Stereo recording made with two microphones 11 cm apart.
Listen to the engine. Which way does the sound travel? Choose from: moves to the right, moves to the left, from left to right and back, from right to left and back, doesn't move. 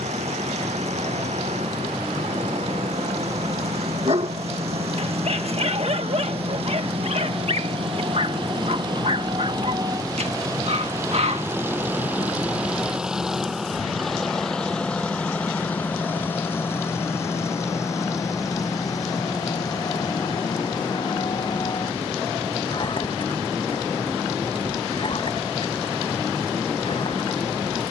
moves to the left.